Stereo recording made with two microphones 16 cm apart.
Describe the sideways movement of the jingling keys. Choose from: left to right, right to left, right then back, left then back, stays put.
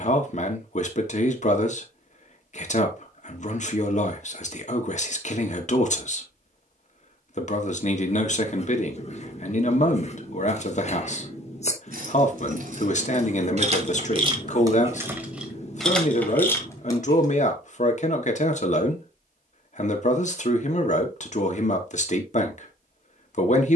right to left.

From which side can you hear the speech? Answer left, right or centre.
left.